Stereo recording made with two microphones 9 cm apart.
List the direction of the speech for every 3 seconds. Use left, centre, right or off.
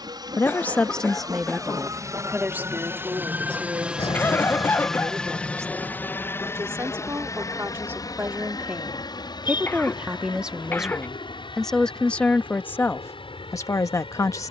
centre, right, right, centre, left.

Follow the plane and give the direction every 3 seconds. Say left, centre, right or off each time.
right, centre, left, left, left.